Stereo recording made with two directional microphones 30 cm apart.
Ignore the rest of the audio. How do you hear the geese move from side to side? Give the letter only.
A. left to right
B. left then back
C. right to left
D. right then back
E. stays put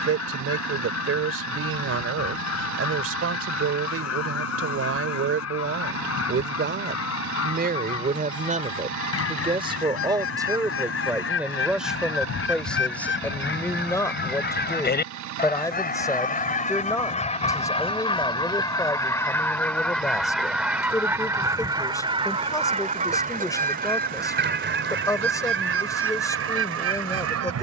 A.